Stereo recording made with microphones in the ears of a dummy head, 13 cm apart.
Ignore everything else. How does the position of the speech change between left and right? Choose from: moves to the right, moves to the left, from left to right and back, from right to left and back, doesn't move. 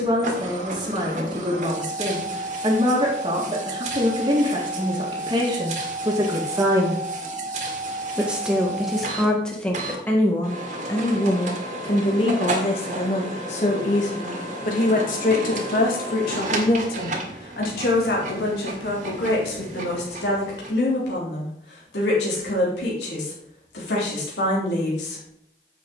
moves to the left.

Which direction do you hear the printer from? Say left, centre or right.
right.